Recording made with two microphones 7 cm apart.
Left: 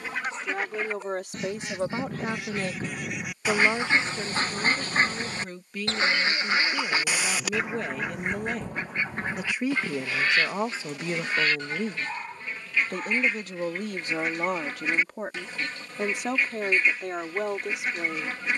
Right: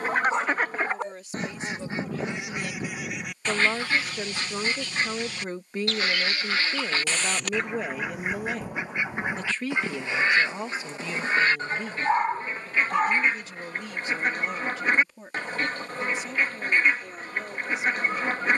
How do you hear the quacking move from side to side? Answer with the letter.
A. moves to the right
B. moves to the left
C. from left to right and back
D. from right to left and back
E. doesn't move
D.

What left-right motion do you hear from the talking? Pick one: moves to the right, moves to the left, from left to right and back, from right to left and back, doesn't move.
from left to right and back.